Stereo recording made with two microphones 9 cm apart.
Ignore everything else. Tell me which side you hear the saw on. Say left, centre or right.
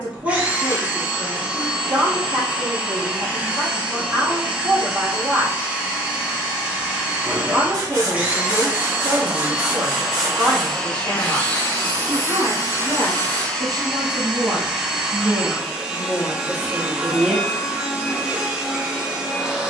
right.